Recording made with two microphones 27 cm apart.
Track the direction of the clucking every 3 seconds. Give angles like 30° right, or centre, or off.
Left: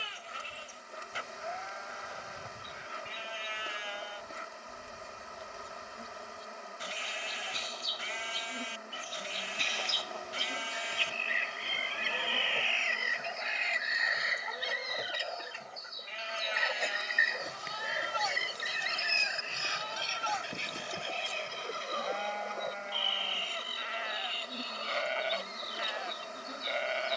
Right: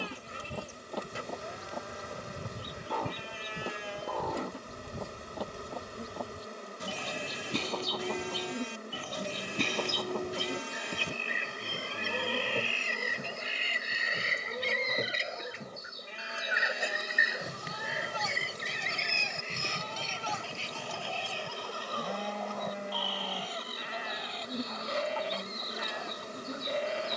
80° right, 80° right, 70° right, 60° right, 40° right, 10° right, 10° left, 30° left, 30° left.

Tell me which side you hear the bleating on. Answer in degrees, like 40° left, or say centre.
50° right.